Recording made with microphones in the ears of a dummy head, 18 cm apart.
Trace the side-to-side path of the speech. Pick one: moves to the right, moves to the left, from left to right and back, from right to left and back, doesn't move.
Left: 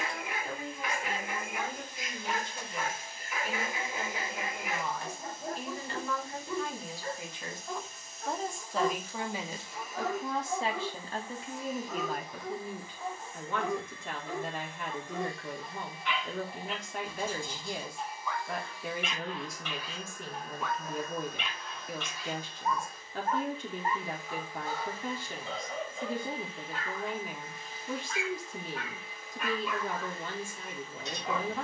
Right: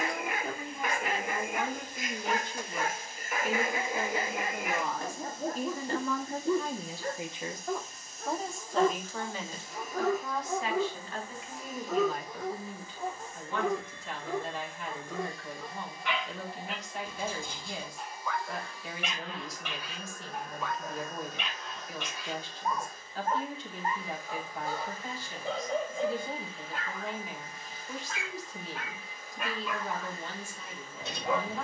moves to the left.